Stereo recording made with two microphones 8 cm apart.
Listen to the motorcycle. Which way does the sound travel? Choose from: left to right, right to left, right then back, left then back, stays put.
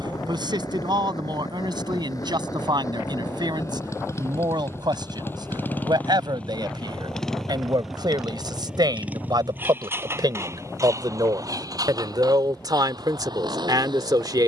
left to right.